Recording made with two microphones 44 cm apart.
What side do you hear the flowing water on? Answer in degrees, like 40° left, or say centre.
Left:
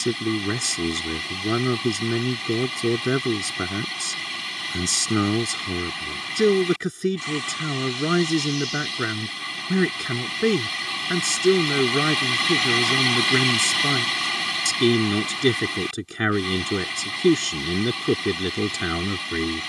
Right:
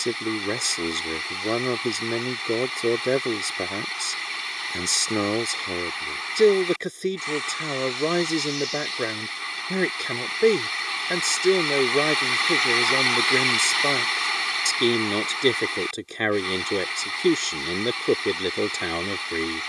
50° left.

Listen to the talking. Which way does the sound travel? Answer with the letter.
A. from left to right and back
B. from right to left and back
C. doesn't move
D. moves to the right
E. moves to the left
C.